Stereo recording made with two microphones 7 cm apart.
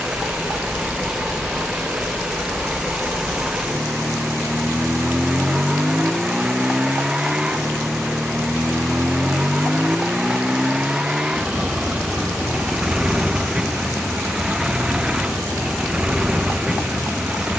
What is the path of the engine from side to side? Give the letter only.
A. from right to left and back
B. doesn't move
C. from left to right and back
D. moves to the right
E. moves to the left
B.